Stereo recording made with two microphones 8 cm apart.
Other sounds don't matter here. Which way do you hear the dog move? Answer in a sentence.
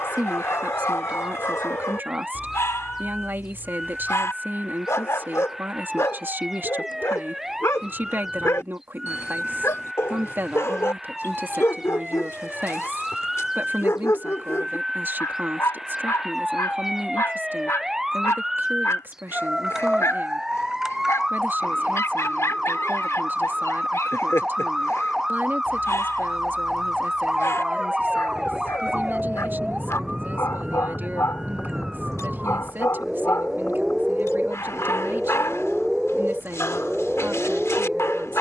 You can hear the dog stay put.